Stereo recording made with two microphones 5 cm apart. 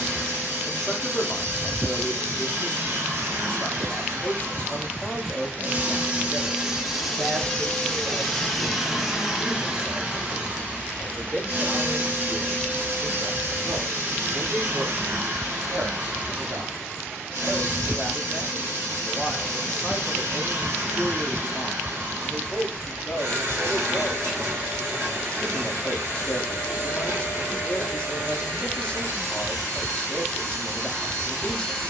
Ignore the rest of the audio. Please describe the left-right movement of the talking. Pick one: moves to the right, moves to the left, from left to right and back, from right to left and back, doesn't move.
from left to right and back.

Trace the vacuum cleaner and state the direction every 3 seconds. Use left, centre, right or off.
right, right, centre, right, right, right, right, right, right, right, right.